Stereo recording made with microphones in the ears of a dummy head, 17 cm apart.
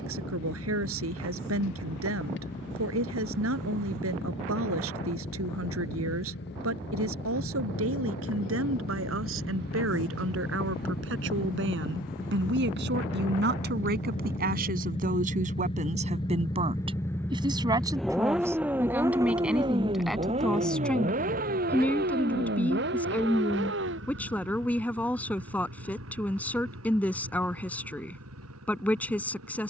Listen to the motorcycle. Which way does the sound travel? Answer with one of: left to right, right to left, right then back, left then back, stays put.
left to right.